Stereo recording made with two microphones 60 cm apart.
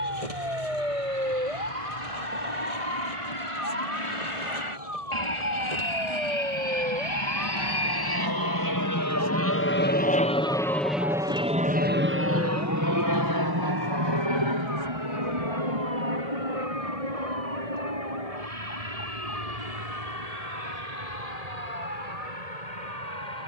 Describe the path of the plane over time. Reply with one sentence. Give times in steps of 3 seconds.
You can hear the plane on the left from 0 s, in the centre from 9 s and on the right from 12 s.